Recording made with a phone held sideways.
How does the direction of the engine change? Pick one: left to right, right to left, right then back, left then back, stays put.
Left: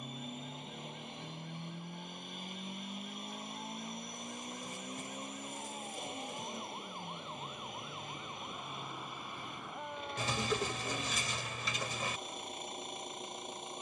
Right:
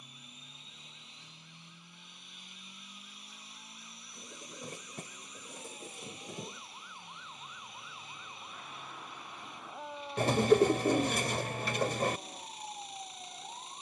stays put.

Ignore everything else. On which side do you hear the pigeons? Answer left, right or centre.
right.